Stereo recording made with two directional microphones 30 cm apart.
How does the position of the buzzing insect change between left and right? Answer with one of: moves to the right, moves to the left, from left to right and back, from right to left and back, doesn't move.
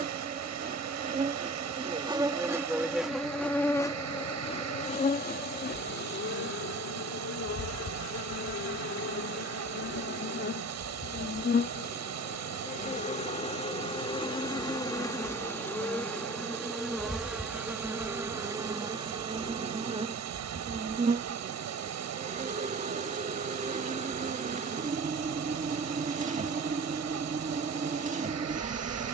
from right to left and back.